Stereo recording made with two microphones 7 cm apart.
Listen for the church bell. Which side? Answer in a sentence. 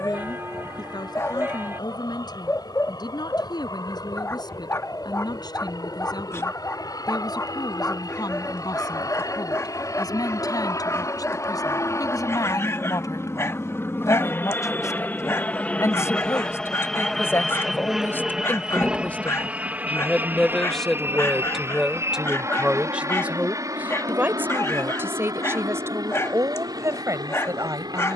In this clip you hear the church bell on the right.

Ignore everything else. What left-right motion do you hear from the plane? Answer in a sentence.
In this clip you hear the plane move to the right.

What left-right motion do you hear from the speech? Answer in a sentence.
You can hear the speech go from the left side to the right.